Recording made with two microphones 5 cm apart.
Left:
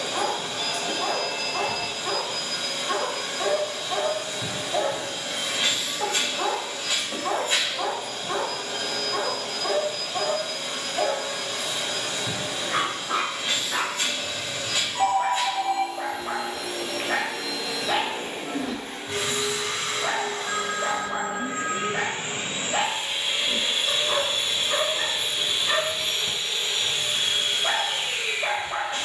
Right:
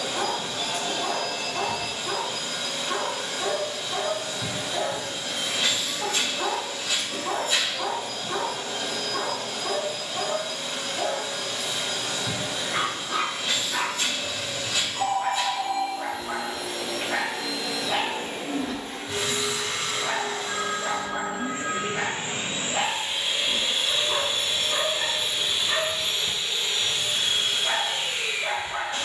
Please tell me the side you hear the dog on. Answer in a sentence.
You can hear the dog on the left.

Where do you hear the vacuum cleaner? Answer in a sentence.
You can hear the vacuum cleaner on the left.